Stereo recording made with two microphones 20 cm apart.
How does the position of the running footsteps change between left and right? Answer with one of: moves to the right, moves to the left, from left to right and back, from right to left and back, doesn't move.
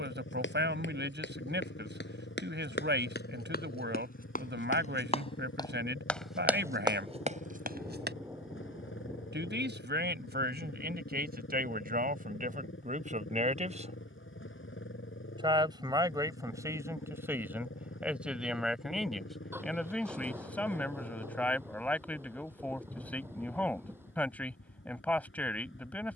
moves to the right.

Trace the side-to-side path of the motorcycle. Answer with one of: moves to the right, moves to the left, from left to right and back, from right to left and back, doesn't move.
doesn't move.